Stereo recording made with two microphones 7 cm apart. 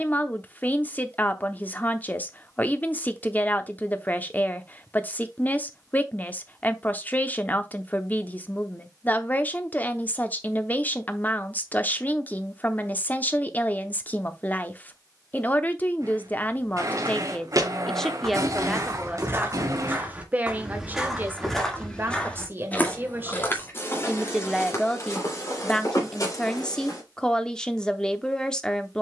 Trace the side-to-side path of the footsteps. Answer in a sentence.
In this clip you hear the footsteps travel towards the left.